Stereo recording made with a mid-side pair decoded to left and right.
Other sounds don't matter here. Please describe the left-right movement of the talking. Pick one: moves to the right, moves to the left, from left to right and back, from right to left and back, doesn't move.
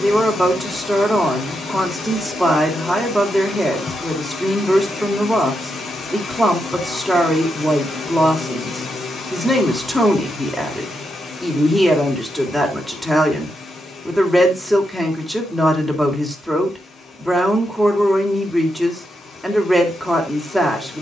doesn't move.